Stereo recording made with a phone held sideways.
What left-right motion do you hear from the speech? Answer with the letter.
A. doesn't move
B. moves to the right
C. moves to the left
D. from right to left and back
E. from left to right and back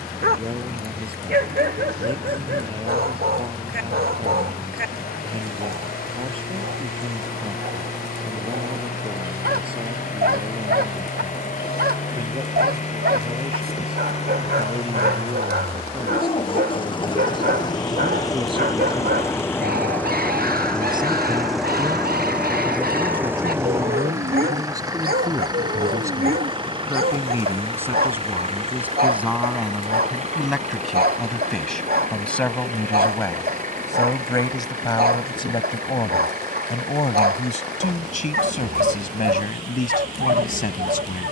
C.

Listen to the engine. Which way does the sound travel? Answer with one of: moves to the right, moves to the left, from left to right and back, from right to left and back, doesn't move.
moves to the right.